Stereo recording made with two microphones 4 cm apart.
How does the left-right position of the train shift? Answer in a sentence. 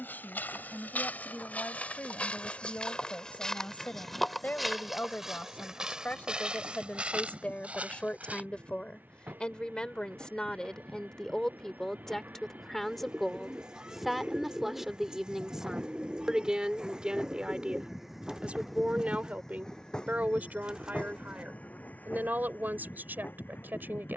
In this clip you hear the train go from the right side to the left.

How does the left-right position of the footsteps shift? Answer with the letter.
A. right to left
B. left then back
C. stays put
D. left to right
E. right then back
D.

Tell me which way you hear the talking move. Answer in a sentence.
You can hear the talking travel towards the right.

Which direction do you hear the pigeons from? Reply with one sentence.
In this clip you hear the pigeons on the right.